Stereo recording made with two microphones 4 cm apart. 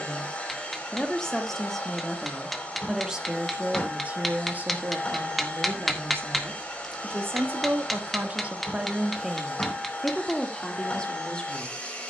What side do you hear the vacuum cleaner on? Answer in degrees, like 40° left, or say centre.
20° left.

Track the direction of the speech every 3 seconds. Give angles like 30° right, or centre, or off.
10° left, 40° right, 50° right, 10° left.